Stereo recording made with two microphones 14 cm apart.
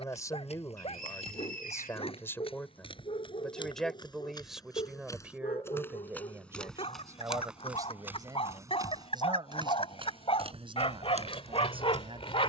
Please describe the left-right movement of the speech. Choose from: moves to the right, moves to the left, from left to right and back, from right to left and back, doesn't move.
moves to the right.